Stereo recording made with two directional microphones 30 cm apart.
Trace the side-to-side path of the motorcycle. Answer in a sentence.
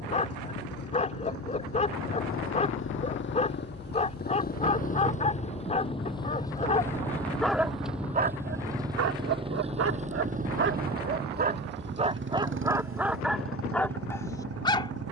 You can hear the motorcycle move from left to right.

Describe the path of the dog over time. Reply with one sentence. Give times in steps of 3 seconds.
In this clip you hear the dog on the left from 0 s, in the centre from 6 s, on the right from 9 s and in the centre from 12 s.